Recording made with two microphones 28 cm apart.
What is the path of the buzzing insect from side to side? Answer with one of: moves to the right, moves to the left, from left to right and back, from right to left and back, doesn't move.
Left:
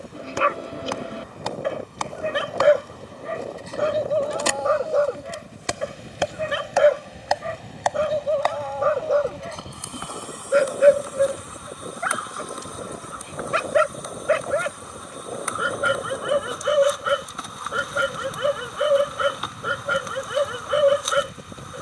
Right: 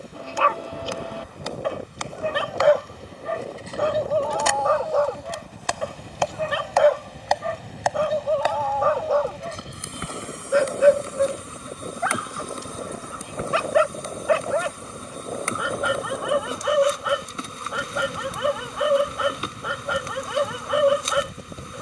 moves to the right.